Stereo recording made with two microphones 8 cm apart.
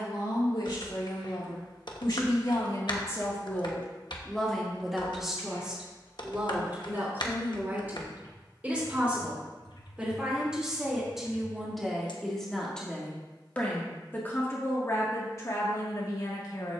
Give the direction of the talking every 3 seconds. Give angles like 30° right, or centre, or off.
60° left, 10° left, 20° right, 10° right, 20° left, 50° left.